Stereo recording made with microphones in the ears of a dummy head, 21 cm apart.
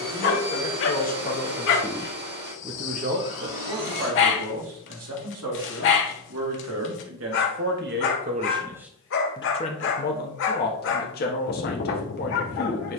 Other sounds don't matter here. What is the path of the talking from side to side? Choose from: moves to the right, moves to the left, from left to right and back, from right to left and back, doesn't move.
from left to right and back.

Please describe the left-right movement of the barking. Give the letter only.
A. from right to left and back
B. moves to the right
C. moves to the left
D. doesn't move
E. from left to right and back
D.